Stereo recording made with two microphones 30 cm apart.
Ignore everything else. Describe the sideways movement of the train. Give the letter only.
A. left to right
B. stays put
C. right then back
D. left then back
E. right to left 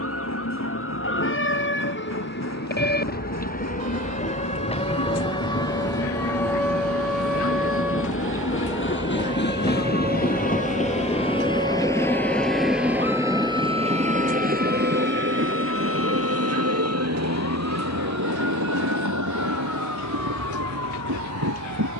A.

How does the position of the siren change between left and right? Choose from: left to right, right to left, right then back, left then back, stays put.
left to right.